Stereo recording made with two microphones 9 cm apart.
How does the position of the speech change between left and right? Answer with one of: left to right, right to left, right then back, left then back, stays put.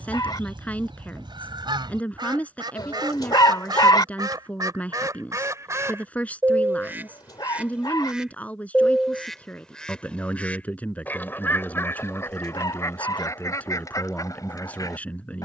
stays put.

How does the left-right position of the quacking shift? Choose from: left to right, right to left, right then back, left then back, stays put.
right to left.